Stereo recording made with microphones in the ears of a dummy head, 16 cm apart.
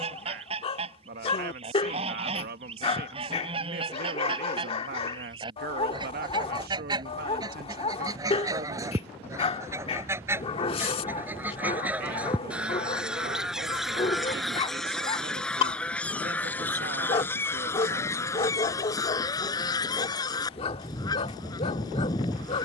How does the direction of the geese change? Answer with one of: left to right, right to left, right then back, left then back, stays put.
right to left.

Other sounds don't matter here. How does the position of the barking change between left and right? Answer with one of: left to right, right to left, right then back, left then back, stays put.
stays put.